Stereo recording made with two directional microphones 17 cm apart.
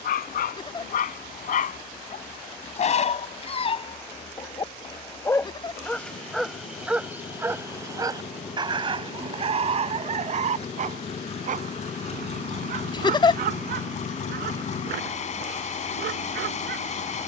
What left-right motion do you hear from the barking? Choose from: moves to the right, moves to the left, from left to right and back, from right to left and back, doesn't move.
moves to the right.